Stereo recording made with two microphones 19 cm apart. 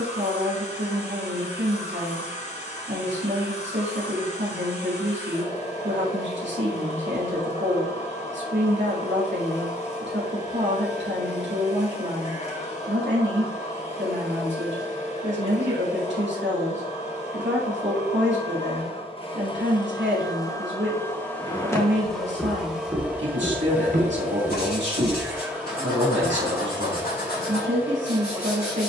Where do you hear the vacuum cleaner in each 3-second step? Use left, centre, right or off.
left, left, left, left, left, left, left, centre, centre, centre.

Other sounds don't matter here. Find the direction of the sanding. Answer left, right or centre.
left.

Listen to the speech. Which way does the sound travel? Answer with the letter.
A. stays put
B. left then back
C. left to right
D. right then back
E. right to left
A.